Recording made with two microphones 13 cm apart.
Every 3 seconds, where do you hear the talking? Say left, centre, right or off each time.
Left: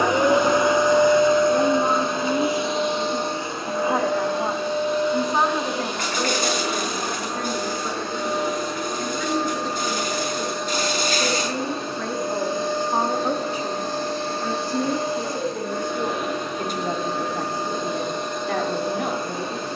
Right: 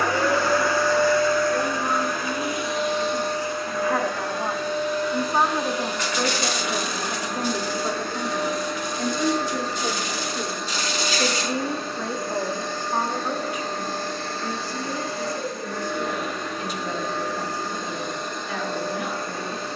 left, centre, right, right, left, left, left.